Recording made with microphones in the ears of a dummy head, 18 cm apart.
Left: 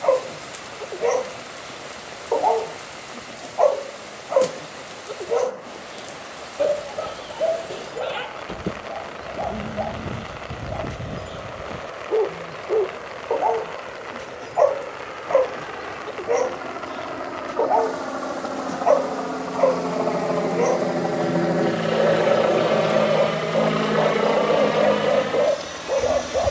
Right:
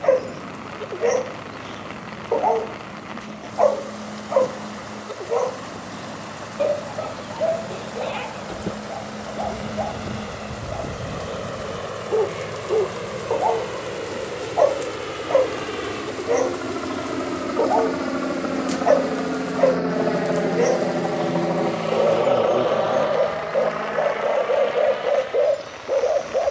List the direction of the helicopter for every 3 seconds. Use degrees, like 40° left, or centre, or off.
60° right, 60° right, 60° right, 60° right, 50° right, 40° right, 20° right, 20° left, 60° left.